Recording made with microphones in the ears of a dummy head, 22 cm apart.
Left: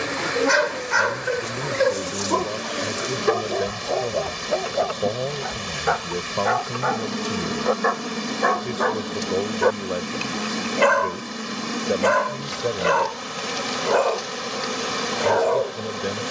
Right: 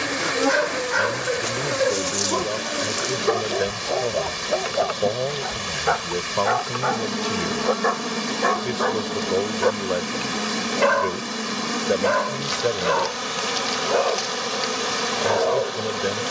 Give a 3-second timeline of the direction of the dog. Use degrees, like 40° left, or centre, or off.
20° left, centre, centre, 20° left, 20° left, 20° left.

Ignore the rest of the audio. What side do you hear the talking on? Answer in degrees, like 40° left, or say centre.
30° right.